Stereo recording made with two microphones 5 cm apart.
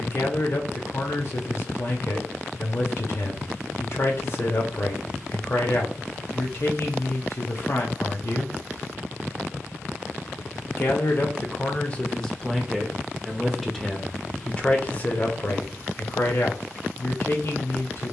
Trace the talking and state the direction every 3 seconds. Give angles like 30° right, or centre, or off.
50° left, 50° left, 50° left, 40° left, 10° left, 40° left.